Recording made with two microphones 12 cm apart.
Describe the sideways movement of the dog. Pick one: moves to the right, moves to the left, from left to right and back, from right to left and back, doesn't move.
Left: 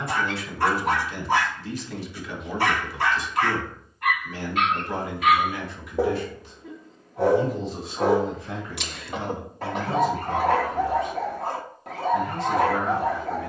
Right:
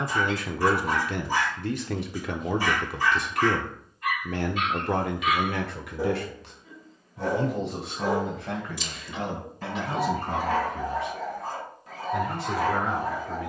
doesn't move.